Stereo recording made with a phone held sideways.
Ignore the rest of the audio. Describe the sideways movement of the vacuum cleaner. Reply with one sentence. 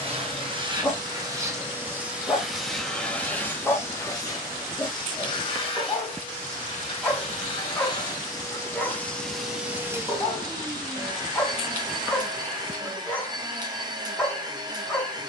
You can hear the vacuum cleaner move from right to left and back again.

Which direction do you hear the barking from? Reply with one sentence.
You can hear the barking in the centre.